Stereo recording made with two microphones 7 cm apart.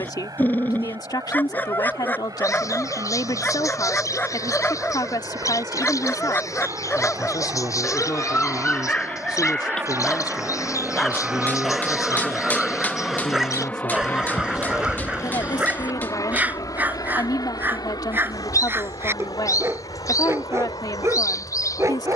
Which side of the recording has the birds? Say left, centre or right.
left.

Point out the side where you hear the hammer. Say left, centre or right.
left.